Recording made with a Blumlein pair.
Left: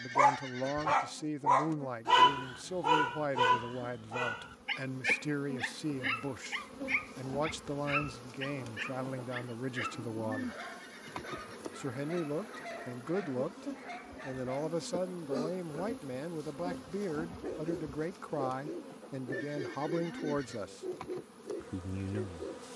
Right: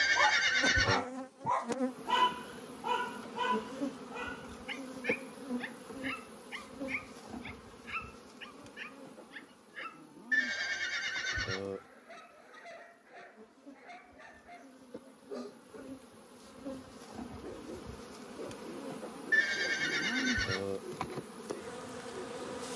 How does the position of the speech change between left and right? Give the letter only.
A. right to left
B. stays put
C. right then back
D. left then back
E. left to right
B.